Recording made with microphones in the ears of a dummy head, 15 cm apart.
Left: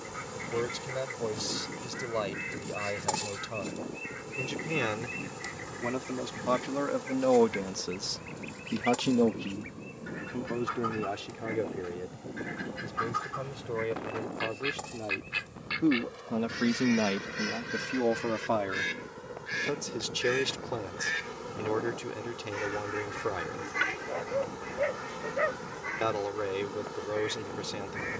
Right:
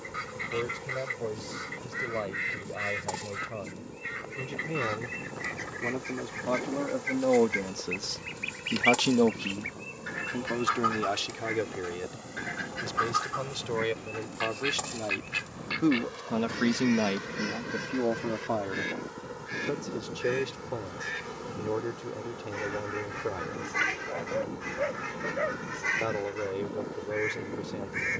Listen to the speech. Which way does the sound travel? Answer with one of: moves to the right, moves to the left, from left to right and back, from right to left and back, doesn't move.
from left to right and back.